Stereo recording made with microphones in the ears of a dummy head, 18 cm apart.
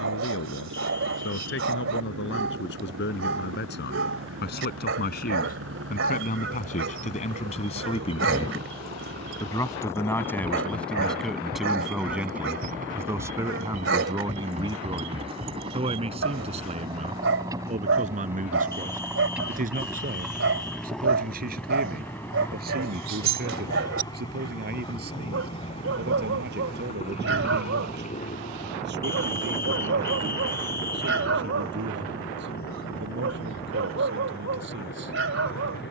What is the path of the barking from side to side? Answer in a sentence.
You can hear the barking stay put.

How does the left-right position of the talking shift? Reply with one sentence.
You can hear the talking travel towards the right.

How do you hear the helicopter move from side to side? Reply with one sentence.
You can hear the helicopter move from right to left.